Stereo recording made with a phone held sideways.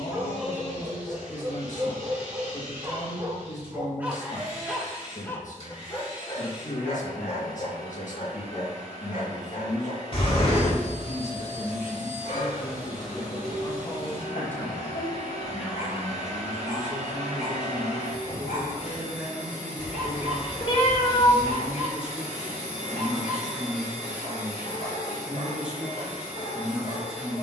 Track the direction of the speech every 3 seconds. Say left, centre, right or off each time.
left, left, left, left, left, centre, centre, centre, centre.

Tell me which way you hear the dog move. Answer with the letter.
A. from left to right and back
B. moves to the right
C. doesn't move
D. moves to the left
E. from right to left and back
D.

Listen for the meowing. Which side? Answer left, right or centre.
left.